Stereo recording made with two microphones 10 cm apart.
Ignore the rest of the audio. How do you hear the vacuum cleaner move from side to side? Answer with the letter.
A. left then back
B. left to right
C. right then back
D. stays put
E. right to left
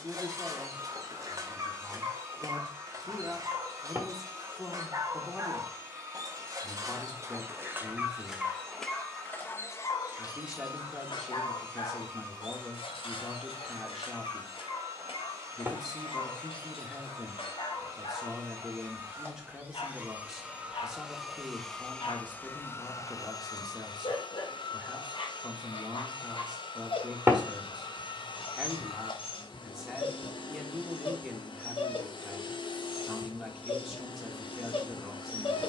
E.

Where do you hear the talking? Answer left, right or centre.
centre.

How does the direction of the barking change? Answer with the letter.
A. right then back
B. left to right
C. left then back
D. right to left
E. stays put
D.